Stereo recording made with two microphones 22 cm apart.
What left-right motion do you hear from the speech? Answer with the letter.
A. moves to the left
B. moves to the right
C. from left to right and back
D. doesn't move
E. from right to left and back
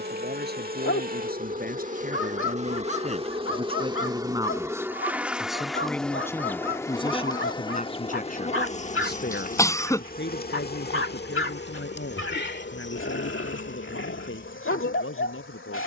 A.